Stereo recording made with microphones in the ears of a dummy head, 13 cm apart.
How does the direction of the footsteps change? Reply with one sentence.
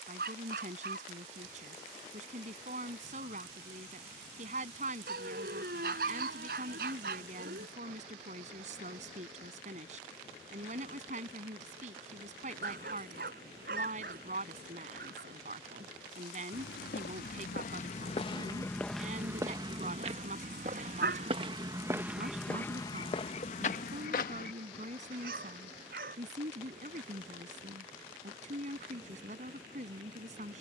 You can hear the footsteps go right and come back.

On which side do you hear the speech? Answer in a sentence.
In this clip you hear the speech on the right.